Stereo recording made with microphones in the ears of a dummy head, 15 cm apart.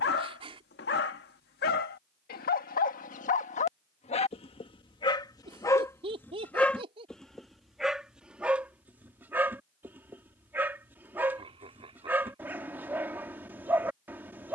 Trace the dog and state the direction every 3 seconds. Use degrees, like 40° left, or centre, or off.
60° left, 30° left, centre, 10° right, 10° right.